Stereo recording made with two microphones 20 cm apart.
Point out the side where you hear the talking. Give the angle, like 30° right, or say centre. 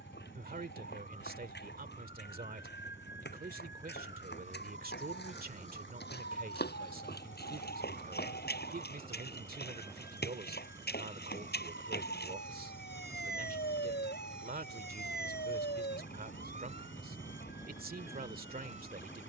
50° right.